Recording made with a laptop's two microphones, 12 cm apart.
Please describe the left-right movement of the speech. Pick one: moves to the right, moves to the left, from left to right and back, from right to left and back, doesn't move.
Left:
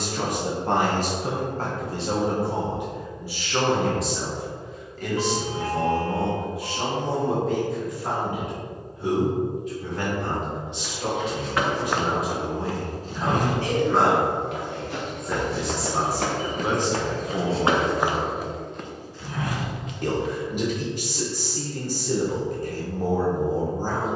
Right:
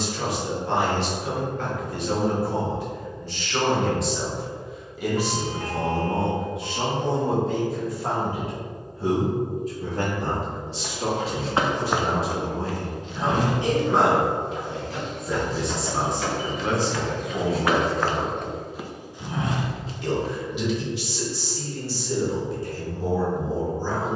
from left to right and back.